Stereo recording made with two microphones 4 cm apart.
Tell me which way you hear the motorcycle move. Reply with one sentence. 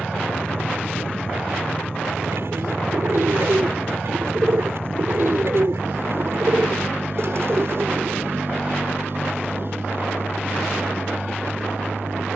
You can hear the motorcycle stay put.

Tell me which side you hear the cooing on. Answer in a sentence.
You can hear the cooing on the right.